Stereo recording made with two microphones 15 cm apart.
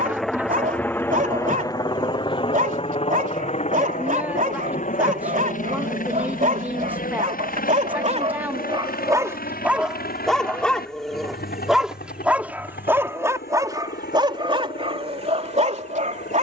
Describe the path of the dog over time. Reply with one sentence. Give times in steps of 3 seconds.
You can hear the dog on the right from 0 s, in the centre from 9 s and on the right from 12 s.